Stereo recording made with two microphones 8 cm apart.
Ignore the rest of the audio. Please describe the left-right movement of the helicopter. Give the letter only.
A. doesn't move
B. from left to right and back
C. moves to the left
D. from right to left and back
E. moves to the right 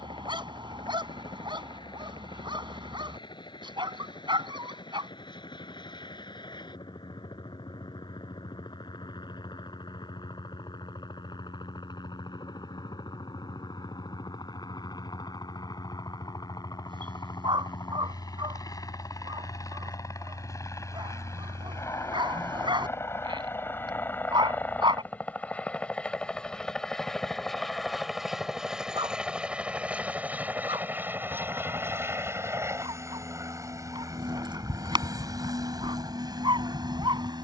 E.